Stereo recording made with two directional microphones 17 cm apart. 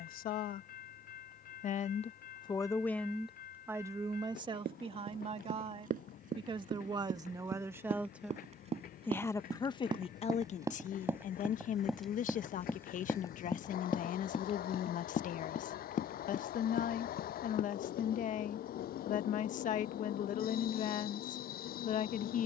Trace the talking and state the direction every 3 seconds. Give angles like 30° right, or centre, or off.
40° left, 30° right, 20° right, 40° left, 50° left, 50° left, 50° left, 50° left.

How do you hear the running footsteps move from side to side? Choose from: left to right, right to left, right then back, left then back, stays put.
right to left.